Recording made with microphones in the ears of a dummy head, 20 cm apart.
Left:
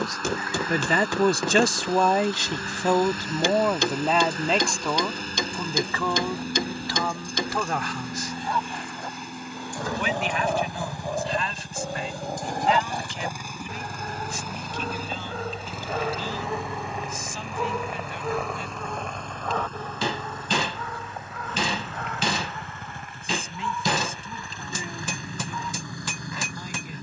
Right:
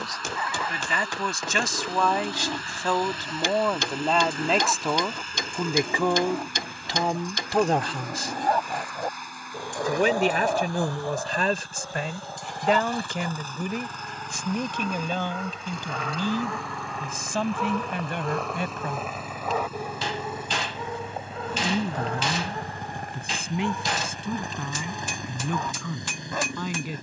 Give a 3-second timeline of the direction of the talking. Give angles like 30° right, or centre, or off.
30° left, centre, 30° right, 40° right, 50° right, 60° right, 60° right, 60° right, 60° right.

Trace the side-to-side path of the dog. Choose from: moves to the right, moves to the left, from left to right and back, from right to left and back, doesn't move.
from right to left and back.